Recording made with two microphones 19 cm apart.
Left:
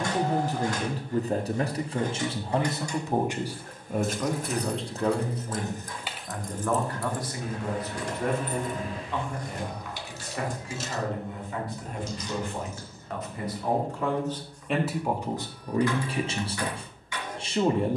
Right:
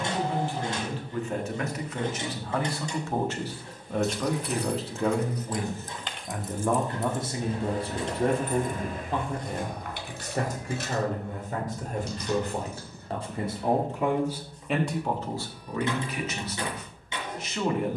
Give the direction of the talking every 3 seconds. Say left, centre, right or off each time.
left, centre, right, right, right, left.